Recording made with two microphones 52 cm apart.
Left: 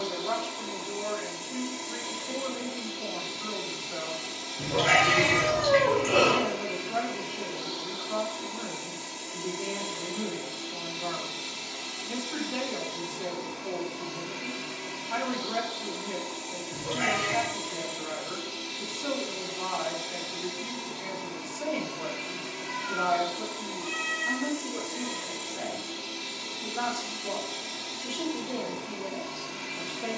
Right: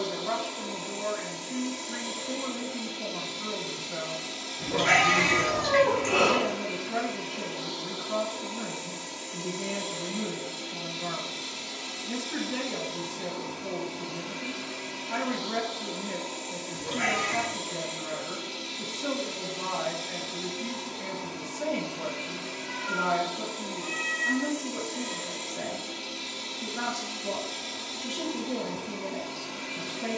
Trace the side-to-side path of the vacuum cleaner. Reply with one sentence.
In this clip you hear the vacuum cleaner stay in one place.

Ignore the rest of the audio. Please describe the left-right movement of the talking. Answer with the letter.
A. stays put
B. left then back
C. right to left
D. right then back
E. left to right
A.